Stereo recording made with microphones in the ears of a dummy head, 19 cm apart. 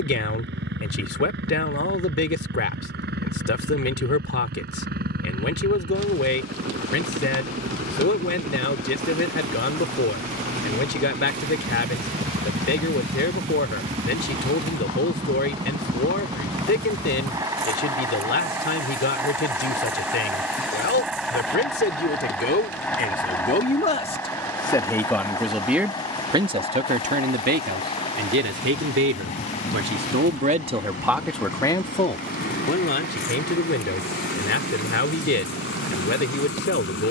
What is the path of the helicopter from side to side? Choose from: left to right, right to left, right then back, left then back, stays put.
right to left.